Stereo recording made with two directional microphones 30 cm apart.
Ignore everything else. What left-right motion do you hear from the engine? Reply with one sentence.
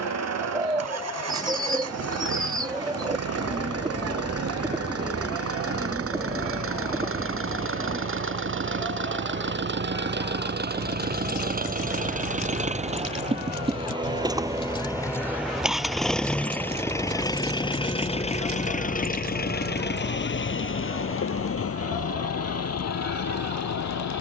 You can hear the engine move to the left.